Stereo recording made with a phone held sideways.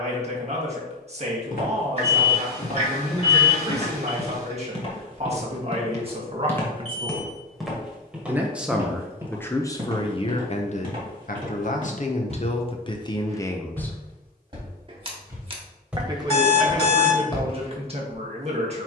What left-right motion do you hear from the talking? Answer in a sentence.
You can hear the talking move from right to left and back again.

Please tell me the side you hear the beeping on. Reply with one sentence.
In this clip you hear the beeping on the left.